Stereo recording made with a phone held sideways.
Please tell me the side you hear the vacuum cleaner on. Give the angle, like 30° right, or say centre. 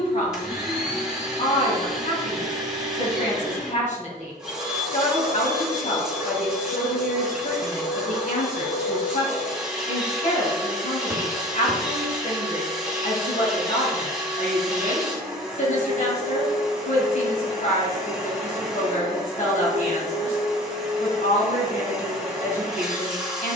centre.